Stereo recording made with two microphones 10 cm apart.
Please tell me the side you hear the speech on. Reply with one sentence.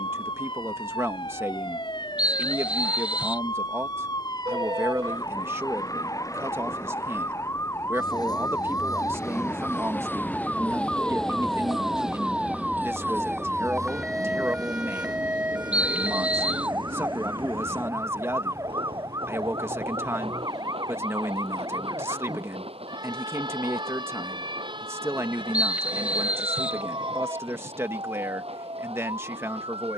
You can hear the speech on the right.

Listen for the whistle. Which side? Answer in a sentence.
You can hear the whistle in the centre.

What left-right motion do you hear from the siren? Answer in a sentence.
In this clip you hear the siren travel towards the right.